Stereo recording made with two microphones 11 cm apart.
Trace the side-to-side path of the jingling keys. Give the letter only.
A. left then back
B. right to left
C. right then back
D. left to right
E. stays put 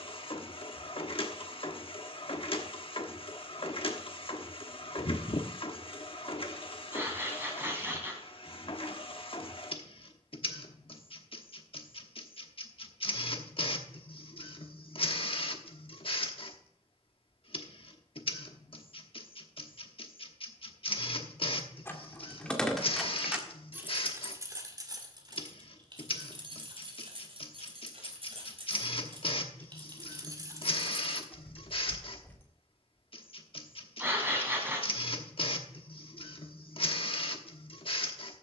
C.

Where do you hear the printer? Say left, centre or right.
left.